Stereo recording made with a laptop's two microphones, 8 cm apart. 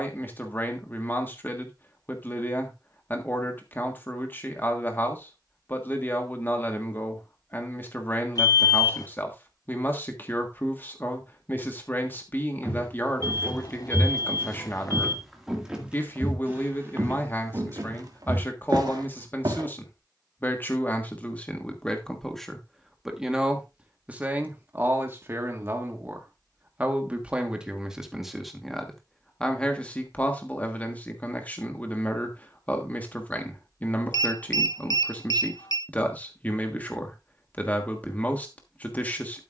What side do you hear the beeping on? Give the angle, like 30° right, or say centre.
60° left.